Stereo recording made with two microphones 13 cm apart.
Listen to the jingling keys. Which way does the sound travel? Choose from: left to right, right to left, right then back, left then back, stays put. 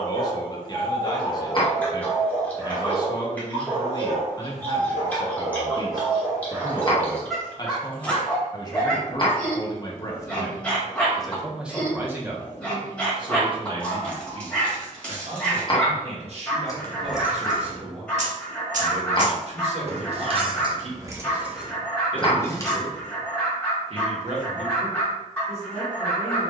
right then back.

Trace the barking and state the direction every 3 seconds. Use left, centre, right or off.
centre, right, centre, centre, centre, centre, centre, centre, centre.